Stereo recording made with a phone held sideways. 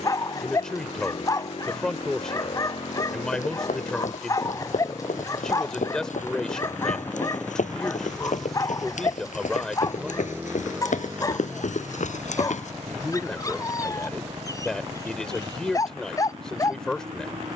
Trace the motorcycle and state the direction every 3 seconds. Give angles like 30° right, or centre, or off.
50° left, 30° left, 10° left, 10° right, 30° right, 50° right.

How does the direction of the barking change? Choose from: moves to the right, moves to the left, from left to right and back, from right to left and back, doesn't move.
doesn't move.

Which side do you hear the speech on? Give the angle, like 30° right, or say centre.
10° left.